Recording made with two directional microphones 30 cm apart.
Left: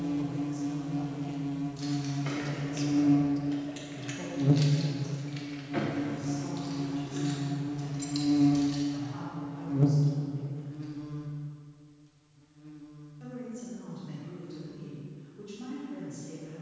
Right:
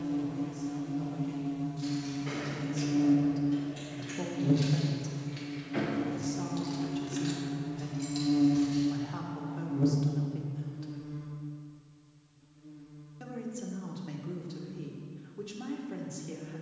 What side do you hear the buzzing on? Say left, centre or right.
left.